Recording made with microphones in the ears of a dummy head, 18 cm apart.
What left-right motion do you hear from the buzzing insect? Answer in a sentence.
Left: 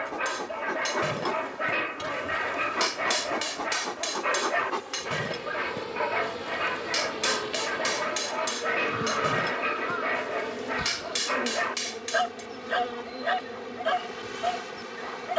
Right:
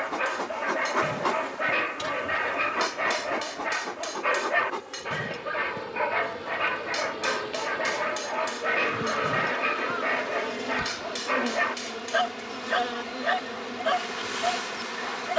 In this clip you hear the buzzing insect move from right to left and back again.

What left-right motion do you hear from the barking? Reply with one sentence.
You can hear the barking stay put.